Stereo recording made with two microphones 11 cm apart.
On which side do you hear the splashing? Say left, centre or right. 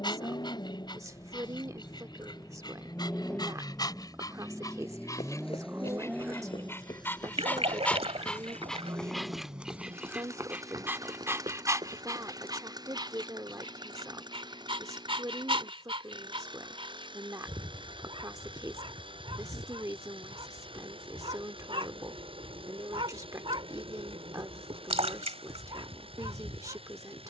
right.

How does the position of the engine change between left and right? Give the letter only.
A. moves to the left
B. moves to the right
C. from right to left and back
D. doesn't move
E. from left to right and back
B.